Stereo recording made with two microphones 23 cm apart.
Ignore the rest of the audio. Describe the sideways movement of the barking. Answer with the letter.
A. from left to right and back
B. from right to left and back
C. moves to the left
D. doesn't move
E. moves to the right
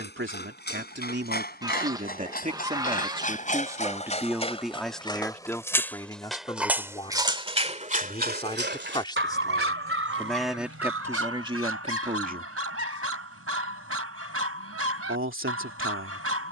E.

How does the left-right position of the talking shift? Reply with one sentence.
In this clip you hear the talking move from right to left and back again.